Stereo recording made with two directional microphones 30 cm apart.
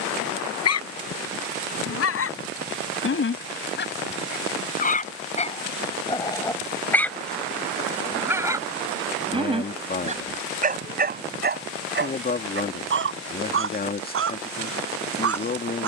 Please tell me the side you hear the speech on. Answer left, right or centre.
left.